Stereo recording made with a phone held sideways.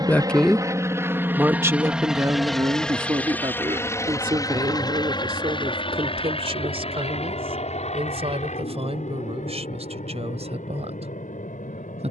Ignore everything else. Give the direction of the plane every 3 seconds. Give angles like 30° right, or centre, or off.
10° right, 30° left, 50° left, 60° left.